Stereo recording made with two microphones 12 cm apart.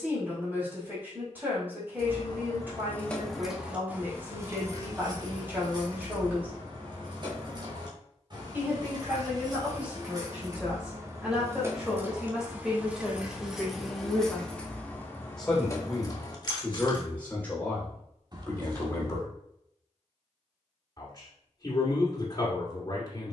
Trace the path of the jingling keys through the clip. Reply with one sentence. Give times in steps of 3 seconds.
You can hear the jingling keys on the left from 0 s, on the right from 3 s, in the centre from 12 s, on the left from 15 s and not at all from 18 s.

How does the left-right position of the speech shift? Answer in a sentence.
In this clip you hear the speech travel towards the left.